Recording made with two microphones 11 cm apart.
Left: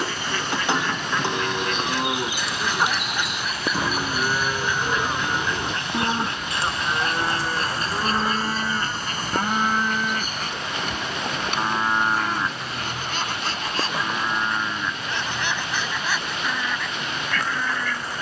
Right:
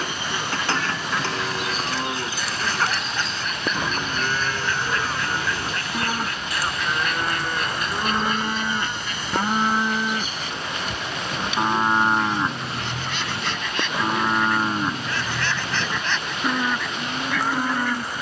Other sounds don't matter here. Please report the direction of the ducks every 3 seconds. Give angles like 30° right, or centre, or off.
10° right, 10° left, 30° left, 50° left, 40° left, 10° left.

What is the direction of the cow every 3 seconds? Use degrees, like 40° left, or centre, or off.
20° left, 20° left, 10° left, 10° right, 30° right, 40° right.